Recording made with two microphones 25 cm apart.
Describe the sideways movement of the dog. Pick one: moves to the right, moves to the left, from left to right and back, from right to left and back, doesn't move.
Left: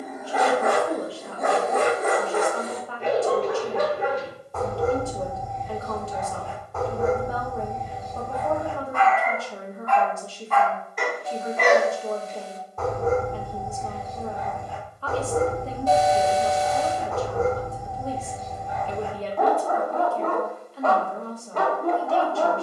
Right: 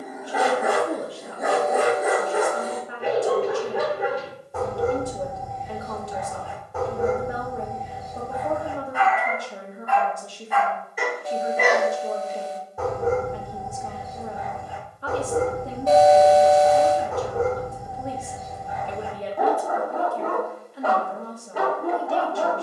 doesn't move.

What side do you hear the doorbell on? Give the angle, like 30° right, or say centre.
60° right.